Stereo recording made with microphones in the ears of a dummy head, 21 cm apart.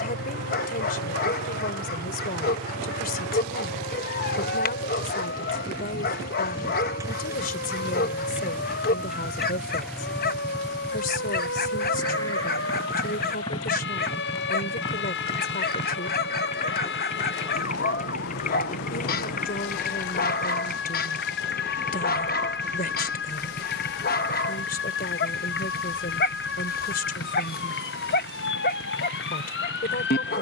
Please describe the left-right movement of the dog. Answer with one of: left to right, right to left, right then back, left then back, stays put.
stays put.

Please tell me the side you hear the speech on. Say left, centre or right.
left.